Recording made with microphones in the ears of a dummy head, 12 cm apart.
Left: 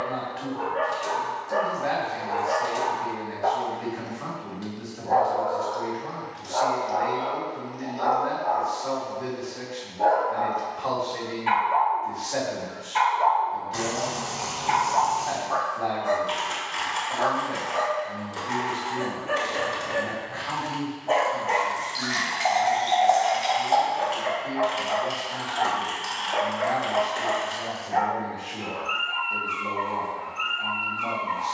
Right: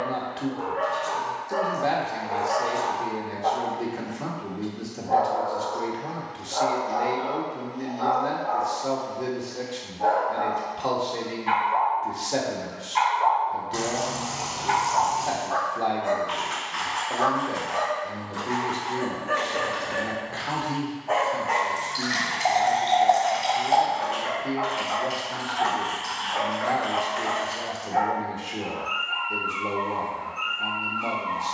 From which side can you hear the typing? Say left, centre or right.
left.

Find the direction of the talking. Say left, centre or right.
right.